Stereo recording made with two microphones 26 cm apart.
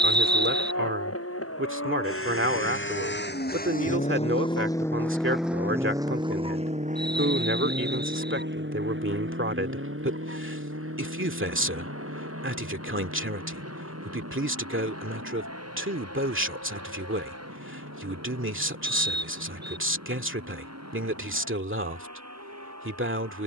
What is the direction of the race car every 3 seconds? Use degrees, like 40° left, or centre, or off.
60° left, 20° left, 30° right, 50° right, 60° right, 60° right, 70° right, 70° right.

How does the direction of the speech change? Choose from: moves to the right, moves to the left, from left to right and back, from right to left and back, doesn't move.
doesn't move.